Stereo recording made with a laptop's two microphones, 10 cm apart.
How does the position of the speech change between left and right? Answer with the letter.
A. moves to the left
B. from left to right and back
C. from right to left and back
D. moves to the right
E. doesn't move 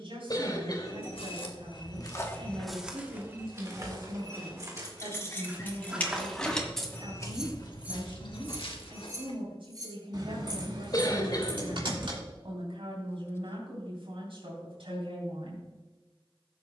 E.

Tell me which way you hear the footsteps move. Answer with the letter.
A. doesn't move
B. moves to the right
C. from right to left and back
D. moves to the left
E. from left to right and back
E.